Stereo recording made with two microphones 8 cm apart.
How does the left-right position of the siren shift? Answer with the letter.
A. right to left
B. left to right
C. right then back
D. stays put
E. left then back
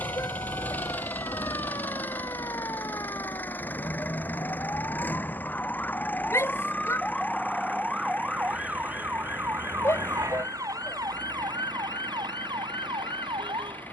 B.